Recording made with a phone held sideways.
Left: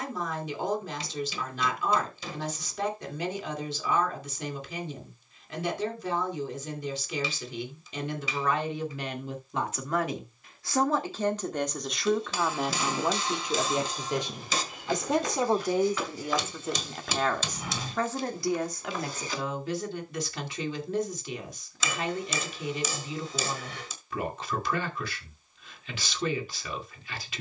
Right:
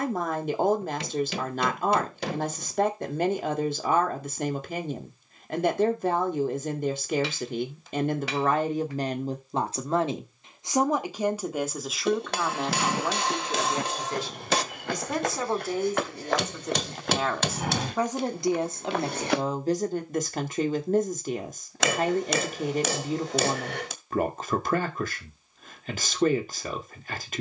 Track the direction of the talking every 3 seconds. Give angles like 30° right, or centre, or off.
50° right, 50° right, 50° right, 20° right, 10° left, 10° left, 40° right, 50° right, 50° right.